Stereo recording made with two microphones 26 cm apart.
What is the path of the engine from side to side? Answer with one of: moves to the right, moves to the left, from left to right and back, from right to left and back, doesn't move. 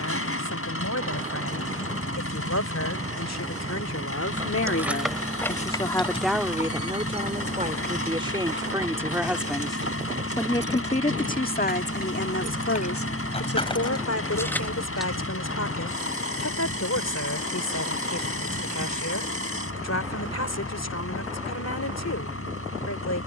doesn't move.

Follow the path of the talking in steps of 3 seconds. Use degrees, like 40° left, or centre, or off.
80° left, 60° left, 20° right, 20° left, 60° left, 80° left, 80° left, 80° left.